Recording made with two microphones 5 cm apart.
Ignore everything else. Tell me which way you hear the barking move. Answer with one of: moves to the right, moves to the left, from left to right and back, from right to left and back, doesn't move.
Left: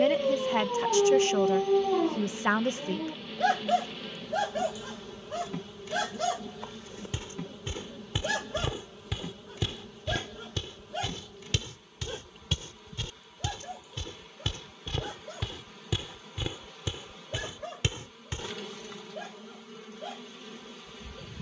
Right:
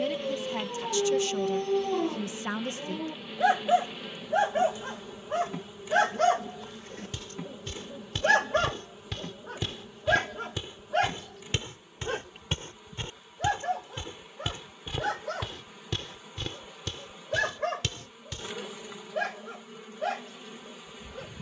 moves to the right.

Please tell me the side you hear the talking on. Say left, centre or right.
left.